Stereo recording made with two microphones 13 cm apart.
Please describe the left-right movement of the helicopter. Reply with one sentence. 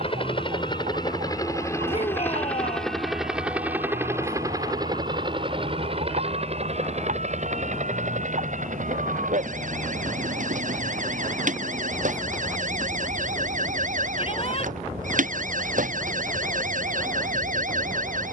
You can hear the helicopter travel towards the right.